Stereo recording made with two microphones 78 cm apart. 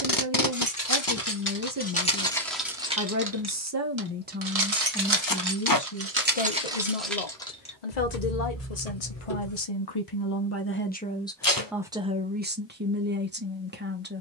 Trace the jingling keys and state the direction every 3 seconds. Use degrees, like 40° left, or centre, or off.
10° left, 30° right, centre, 20° left, off.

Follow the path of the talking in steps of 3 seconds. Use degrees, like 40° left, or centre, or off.
20° right, centre, 50° left, 20° left, 10° right.